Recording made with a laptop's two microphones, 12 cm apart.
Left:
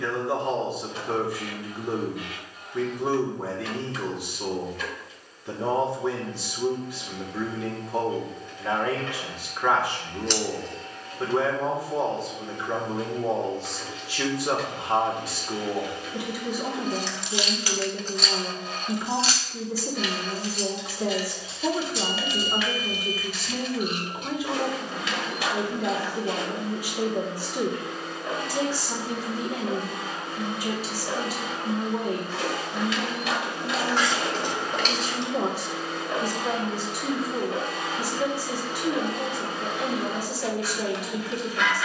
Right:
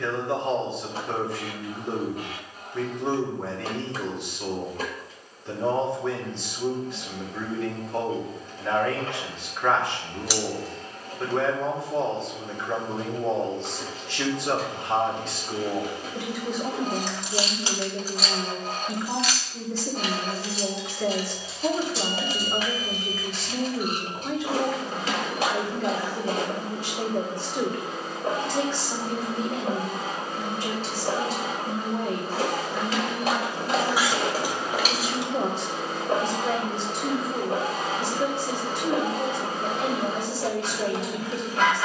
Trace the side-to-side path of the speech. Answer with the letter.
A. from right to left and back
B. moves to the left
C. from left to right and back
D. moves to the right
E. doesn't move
E.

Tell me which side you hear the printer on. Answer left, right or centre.
right.